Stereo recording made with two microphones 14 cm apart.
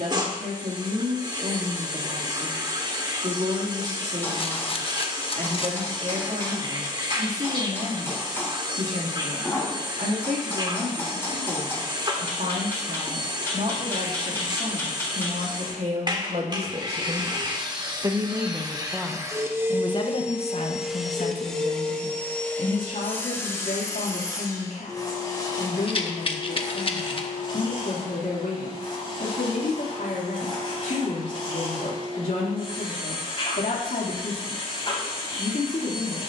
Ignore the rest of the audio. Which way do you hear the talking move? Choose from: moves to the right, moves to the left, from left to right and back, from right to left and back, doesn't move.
moves to the left.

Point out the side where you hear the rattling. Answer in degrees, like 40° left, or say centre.
40° left.